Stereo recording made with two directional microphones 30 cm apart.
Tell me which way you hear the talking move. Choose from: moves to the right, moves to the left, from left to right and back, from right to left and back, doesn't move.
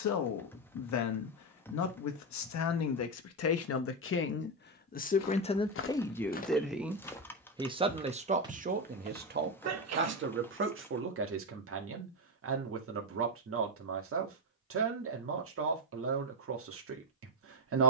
moves to the right.